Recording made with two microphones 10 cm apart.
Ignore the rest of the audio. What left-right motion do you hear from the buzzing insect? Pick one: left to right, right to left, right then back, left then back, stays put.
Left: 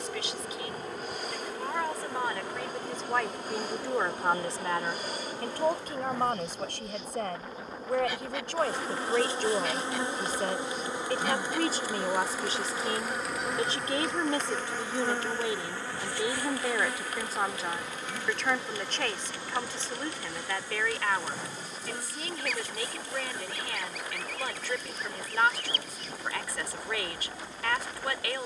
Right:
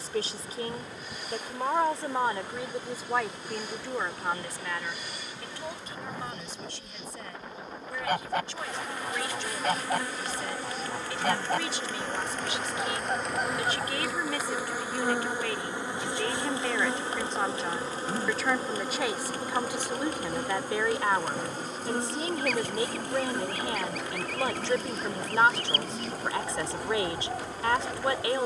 left to right.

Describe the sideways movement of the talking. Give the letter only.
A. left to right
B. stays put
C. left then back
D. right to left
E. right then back
C.